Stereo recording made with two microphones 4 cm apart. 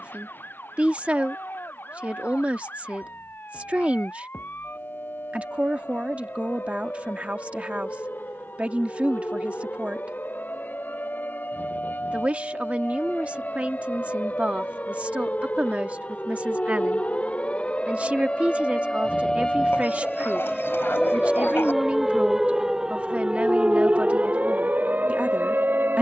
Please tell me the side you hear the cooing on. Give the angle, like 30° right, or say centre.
60° left.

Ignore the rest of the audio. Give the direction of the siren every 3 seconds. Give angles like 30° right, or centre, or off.
60° left, 50° left, 50° left, 50° left, 40° left, 40° left, 20° left, 10° right, 40° right.